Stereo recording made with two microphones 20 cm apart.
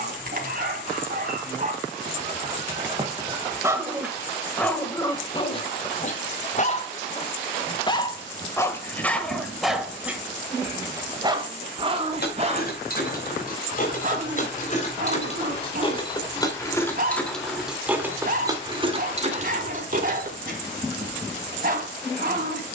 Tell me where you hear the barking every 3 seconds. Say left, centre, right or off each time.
right, centre, left, centre, right, right, right, right.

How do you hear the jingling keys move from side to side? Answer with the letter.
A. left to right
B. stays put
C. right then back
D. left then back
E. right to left
A.